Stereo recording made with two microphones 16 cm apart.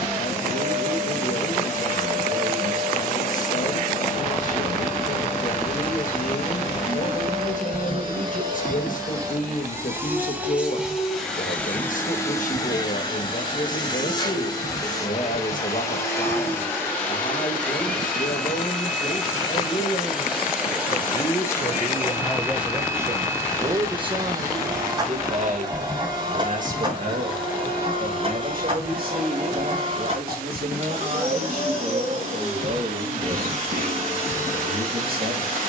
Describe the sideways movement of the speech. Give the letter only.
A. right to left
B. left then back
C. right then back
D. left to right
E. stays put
D.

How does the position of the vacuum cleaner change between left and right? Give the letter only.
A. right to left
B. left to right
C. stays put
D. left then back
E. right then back
D.